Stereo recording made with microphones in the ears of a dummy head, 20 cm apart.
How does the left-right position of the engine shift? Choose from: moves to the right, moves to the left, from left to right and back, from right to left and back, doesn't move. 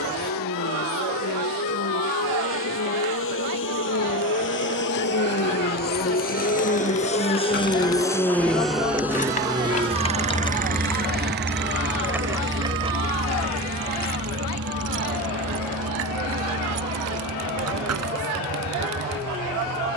moves to the right.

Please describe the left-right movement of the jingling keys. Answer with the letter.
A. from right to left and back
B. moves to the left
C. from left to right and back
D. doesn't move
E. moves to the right
E.